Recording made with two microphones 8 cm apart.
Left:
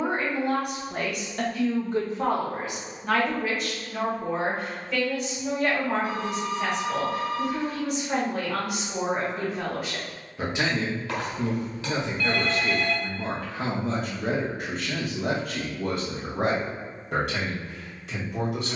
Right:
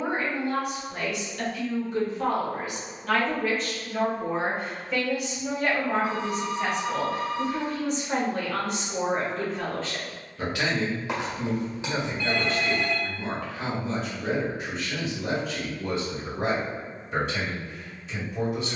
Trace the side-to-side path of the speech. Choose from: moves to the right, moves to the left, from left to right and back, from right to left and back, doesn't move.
from left to right and back.